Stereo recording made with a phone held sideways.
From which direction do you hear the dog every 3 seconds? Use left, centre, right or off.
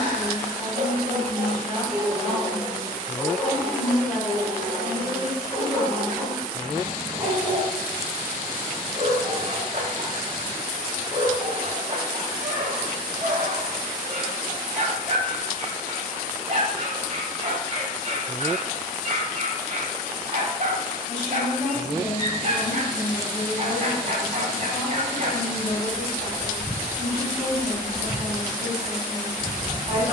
right, centre, right, right, right, right, right, right, right, right.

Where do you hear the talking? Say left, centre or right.
left.